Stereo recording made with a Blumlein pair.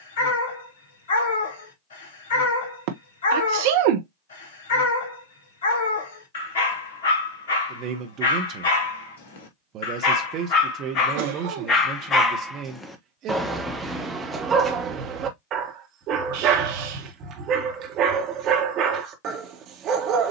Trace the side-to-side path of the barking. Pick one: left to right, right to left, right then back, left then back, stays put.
left to right.